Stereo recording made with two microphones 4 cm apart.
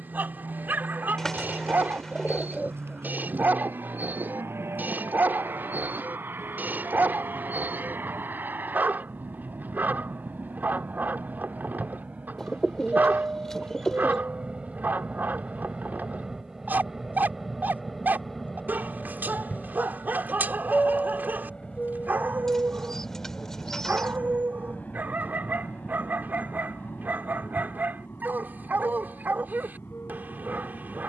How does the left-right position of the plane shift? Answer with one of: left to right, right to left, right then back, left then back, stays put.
right to left.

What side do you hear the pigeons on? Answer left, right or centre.
centre.